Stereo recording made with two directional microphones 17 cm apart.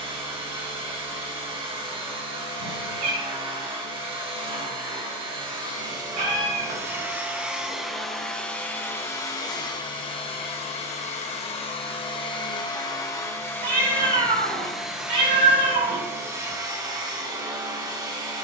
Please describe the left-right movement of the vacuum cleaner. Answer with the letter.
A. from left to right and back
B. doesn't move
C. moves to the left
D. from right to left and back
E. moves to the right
D.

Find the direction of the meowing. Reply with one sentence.
In this clip you hear the meowing on the right.